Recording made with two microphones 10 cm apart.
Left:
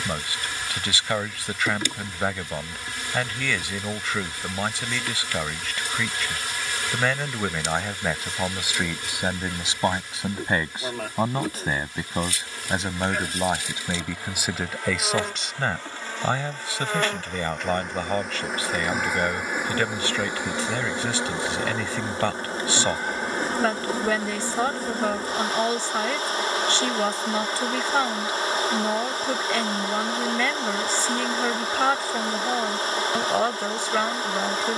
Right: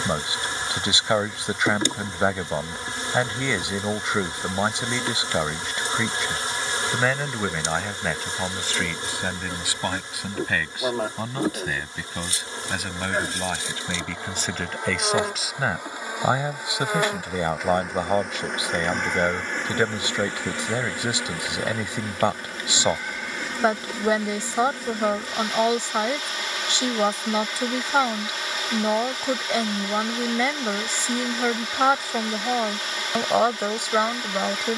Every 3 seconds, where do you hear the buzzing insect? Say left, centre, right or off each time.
right, right, right, right, right, centre, centre, left, left, left, left, left.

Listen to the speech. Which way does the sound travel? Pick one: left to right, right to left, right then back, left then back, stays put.
left then back.